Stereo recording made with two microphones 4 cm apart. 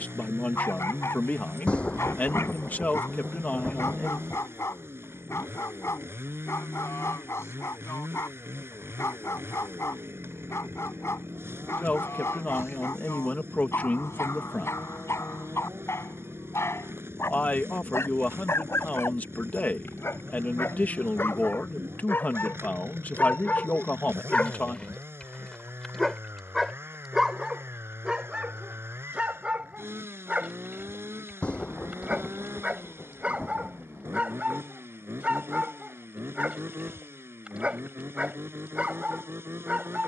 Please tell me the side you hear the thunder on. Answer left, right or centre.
left.